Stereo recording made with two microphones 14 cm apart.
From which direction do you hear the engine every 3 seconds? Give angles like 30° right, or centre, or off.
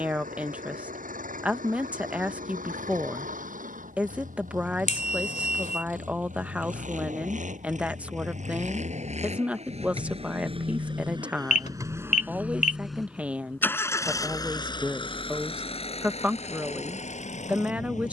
80° right, 70° right, 60° right, 40° right, 10° left, 50° left.